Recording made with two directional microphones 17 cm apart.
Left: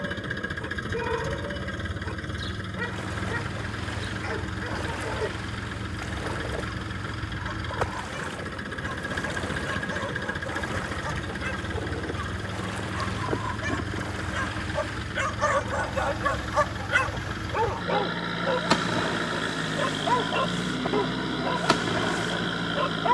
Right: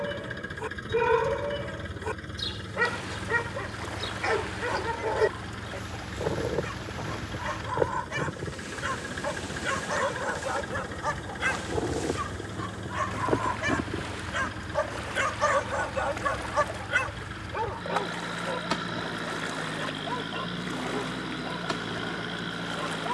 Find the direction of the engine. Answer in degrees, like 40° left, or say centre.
30° left.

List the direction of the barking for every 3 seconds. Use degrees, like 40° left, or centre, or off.
40° right, 40° right, 40° right, 40° right, 20° right, 10° left, 50° left, 60° left.